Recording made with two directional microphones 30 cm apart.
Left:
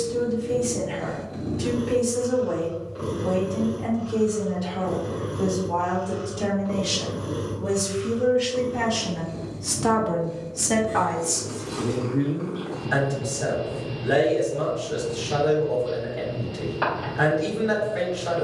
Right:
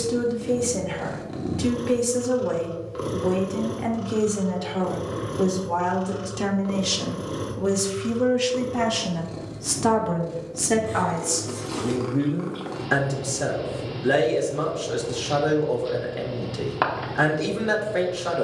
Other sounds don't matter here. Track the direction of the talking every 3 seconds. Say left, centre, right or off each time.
right, right, right, centre, right, right.